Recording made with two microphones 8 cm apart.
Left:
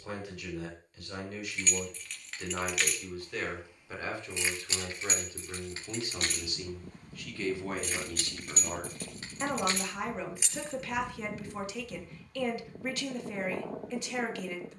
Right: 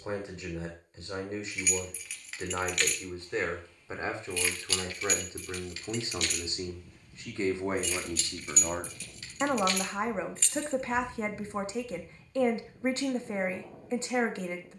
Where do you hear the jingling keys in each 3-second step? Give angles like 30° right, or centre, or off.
centre, 20° left, 50° left, 30° left, off.